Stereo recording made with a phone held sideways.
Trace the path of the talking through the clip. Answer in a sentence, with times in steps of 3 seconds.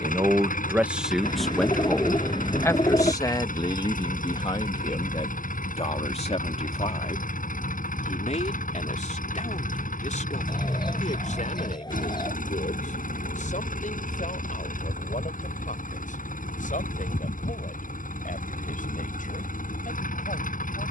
In this clip you hear the talking in the centre from 0 s and on the left from 3 s.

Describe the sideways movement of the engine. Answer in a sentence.
In this clip you hear the engine stay in one place.